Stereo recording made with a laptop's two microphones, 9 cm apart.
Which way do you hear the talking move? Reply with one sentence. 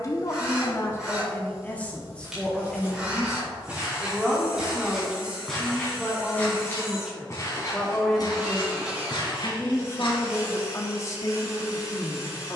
You can hear the talking go right and come back.